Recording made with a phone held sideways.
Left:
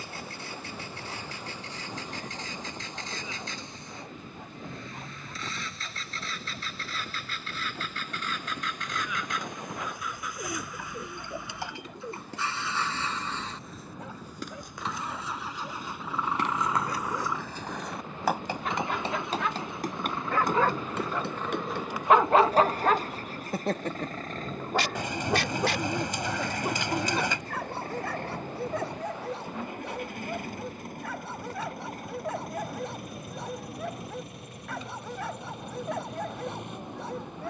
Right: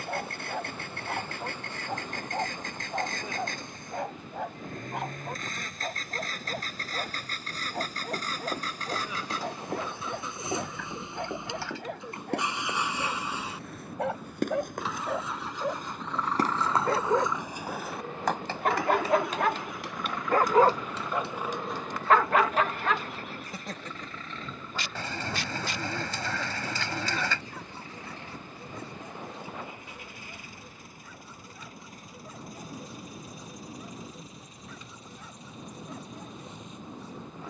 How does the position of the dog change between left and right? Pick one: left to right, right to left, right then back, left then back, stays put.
right to left.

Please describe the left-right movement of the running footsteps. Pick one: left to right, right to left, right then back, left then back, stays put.
right to left.